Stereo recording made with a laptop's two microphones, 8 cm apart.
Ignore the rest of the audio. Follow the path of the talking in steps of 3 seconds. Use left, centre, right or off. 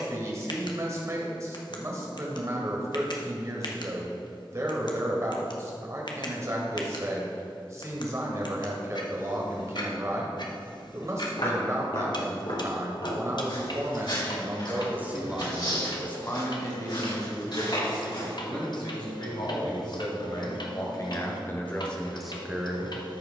right, right, right, right, right, left, left, centre.